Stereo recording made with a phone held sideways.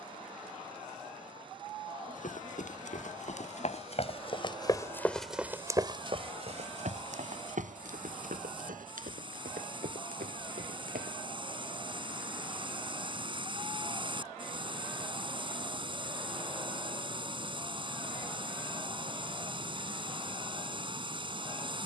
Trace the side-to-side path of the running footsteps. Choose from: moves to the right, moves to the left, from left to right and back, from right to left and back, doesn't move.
moves to the right.